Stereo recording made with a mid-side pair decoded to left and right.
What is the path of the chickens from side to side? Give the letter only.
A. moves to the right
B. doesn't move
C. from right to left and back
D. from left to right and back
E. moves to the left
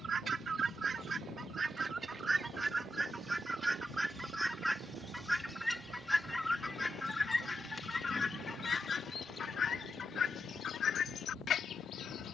E.